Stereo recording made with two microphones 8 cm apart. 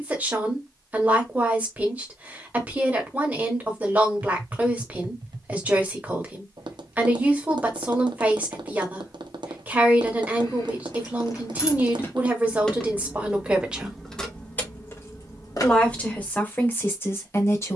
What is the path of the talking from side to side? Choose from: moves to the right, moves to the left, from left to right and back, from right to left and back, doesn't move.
moves to the left.